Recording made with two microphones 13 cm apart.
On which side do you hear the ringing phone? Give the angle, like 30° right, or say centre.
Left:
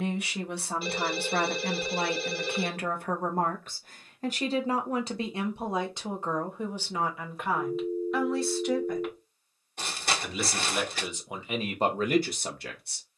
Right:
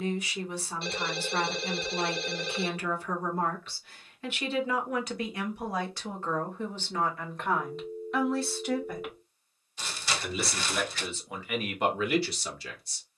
10° left.